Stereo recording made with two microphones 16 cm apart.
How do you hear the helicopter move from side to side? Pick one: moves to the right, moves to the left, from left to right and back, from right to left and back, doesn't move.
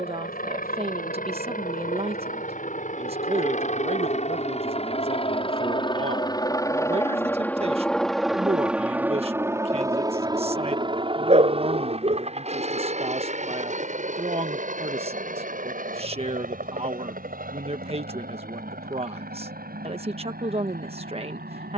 moves to the right.